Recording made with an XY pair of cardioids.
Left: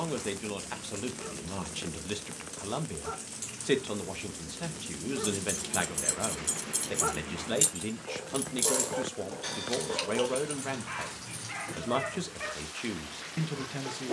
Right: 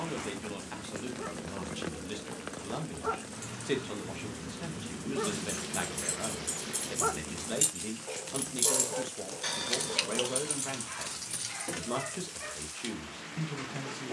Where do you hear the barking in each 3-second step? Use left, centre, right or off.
right, right, centre, left, left.